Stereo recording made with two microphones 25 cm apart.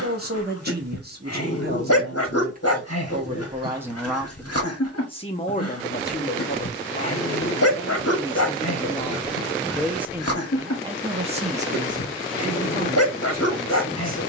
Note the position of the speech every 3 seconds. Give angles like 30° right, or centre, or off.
40° right, 10° left, 30° left, 20° right, 40° right.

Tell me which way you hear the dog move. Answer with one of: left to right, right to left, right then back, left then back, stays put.
stays put.